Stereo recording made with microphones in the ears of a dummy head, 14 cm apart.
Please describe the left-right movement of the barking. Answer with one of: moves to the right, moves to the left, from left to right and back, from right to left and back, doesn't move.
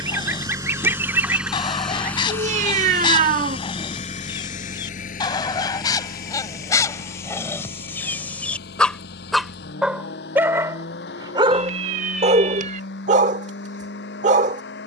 moves to the right.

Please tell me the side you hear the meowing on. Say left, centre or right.
right.